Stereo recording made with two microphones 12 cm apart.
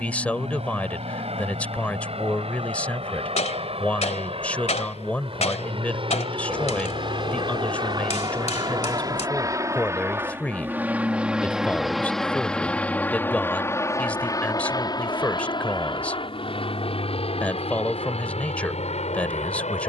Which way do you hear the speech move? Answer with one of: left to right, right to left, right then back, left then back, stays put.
stays put.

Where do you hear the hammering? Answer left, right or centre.
left.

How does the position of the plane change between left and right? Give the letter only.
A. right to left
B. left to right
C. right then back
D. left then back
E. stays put
A.